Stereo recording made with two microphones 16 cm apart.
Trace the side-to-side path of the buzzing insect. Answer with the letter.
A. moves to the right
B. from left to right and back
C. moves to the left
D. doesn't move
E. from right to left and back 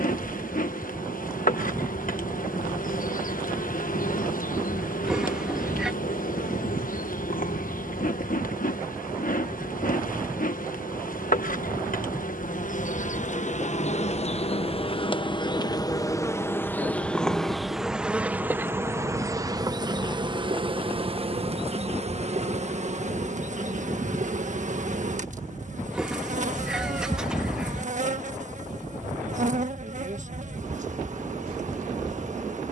A.